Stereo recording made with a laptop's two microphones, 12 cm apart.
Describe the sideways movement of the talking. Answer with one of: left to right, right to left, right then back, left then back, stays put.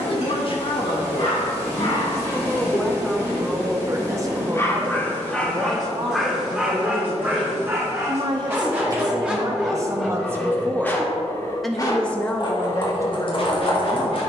right then back.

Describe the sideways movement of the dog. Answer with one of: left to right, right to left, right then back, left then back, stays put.
right then back.